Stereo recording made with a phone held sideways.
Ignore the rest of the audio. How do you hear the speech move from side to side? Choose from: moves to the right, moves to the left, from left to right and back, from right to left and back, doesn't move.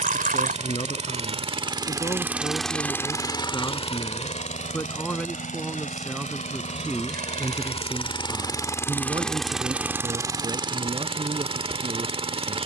moves to the right.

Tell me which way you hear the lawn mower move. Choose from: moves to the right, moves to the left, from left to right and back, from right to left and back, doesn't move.
from right to left and back.